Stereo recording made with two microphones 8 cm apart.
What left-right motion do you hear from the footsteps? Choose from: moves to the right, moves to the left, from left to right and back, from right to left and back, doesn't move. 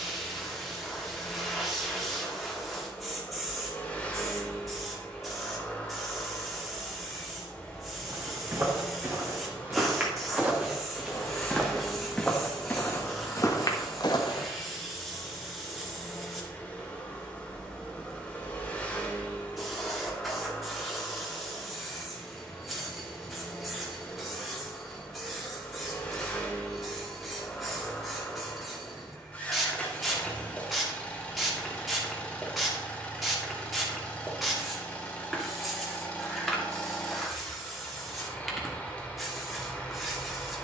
moves to the left.